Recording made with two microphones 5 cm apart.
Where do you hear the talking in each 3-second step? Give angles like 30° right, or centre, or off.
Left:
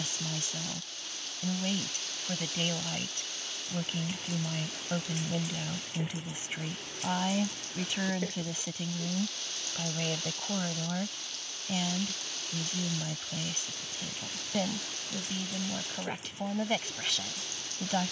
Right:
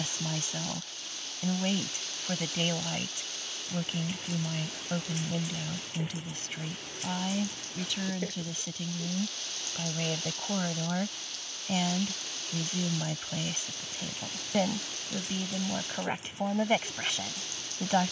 20° right, centre, 20° left, 10° right, 20° right, 20° right.